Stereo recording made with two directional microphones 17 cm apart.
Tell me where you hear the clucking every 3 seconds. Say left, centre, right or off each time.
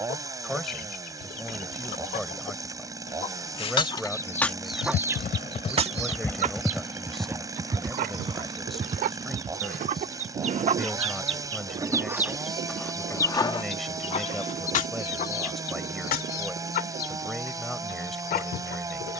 left, centre, right, right, left, left, left.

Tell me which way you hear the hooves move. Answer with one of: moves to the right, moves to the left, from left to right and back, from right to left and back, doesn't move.
moves to the right.